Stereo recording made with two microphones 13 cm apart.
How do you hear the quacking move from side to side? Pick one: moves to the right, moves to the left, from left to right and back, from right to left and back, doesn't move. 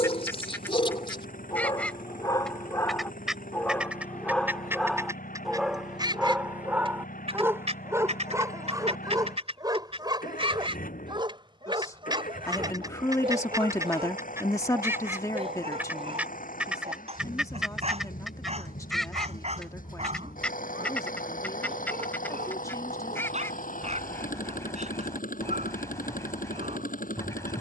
from left to right and back.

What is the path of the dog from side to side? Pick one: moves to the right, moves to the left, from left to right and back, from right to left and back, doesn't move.
moves to the right.